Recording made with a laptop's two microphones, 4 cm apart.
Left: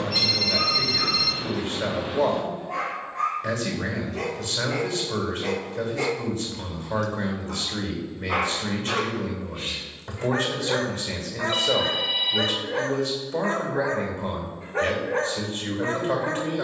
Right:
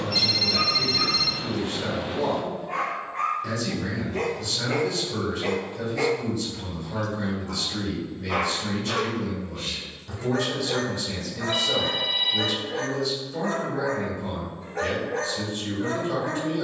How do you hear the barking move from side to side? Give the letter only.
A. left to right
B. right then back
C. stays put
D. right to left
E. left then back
D.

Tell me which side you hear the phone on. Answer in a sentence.
You can hear the phone in the centre.